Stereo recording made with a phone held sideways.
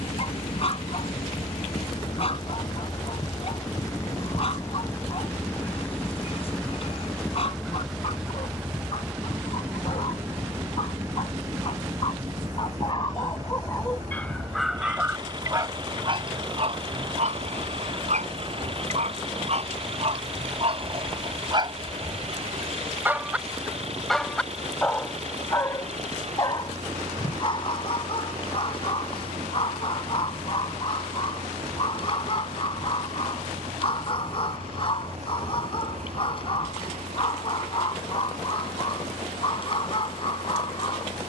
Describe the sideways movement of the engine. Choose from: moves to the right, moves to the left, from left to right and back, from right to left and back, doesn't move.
moves to the right.